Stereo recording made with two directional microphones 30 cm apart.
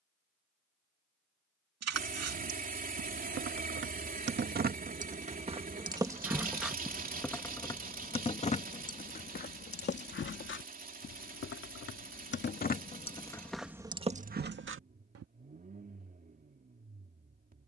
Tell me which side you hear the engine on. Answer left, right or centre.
right.